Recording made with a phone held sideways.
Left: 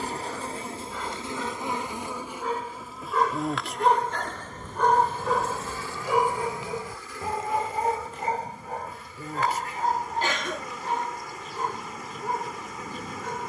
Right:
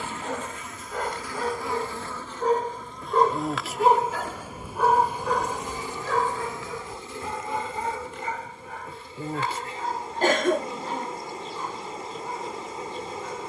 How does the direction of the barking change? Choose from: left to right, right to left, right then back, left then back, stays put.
right to left.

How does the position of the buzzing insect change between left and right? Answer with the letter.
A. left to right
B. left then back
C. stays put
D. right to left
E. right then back
A.